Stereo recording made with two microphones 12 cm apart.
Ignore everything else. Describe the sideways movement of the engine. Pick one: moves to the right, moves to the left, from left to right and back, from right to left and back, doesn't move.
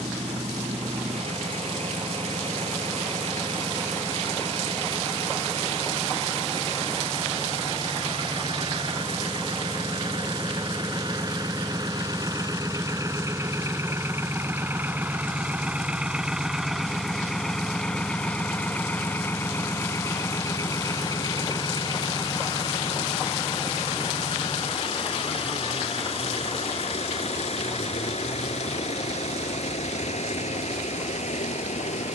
moves to the left.